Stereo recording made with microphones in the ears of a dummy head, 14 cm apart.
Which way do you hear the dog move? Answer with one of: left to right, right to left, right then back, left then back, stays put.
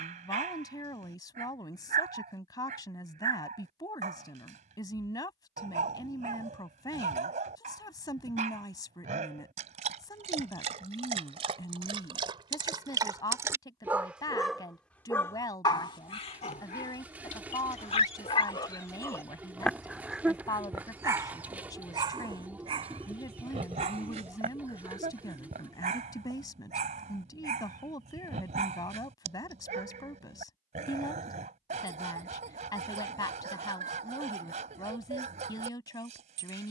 left then back.